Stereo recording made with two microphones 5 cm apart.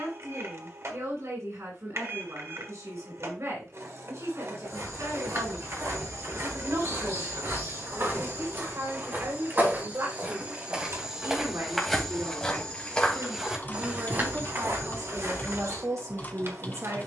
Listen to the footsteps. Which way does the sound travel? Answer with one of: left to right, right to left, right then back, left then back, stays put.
left then back.